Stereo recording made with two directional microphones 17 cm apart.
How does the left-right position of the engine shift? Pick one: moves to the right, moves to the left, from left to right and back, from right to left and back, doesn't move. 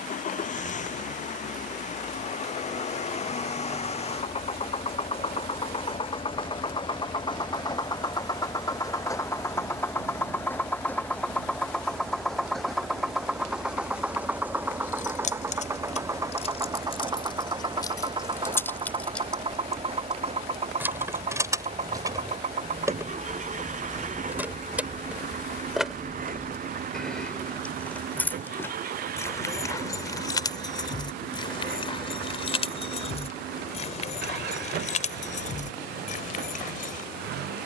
moves to the right.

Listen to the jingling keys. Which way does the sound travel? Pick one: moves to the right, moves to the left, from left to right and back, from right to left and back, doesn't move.
from left to right and back.